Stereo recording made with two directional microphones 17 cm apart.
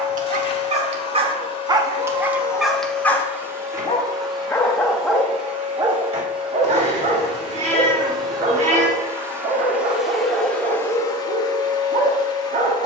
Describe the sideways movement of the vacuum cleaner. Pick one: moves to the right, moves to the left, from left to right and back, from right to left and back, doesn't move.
from left to right and back.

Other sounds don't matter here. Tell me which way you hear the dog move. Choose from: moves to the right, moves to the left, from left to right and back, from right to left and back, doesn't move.
from right to left and back.